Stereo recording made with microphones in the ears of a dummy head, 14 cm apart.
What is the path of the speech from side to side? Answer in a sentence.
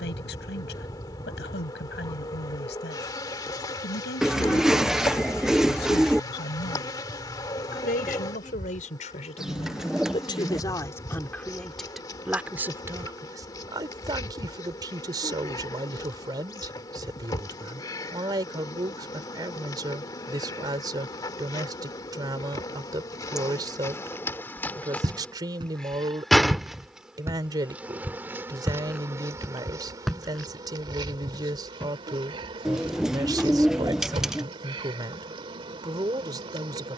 You can hear the speech move from left to right.